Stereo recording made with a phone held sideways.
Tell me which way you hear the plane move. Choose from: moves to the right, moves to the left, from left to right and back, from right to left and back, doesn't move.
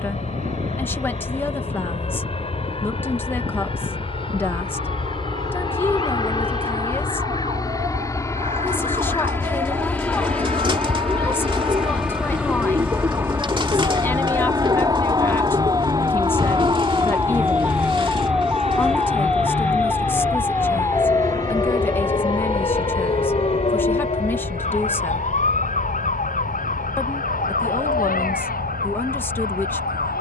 moves to the right.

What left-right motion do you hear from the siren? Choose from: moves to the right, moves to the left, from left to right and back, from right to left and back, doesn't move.
moves to the left.